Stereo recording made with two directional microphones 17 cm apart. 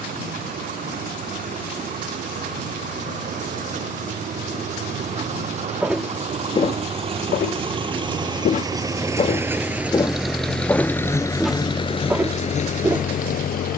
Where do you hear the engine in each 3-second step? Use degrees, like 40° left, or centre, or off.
50° right, 50° right, 30° right, centre, 50° left.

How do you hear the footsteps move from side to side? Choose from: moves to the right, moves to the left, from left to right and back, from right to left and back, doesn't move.
from right to left and back.